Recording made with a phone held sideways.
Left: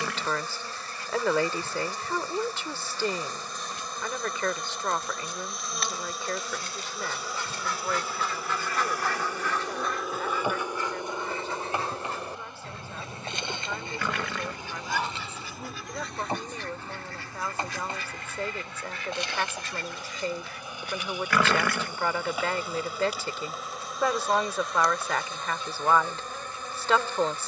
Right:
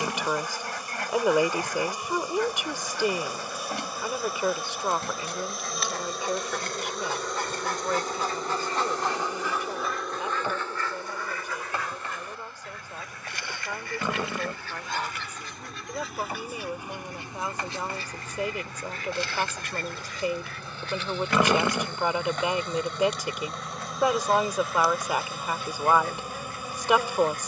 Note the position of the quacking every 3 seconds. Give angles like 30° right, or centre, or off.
80° right, 80° right, 50° right, 10° left, 30° left, 10° right, 50° right, 80° right, 80° right.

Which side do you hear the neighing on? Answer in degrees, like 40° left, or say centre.
20° right.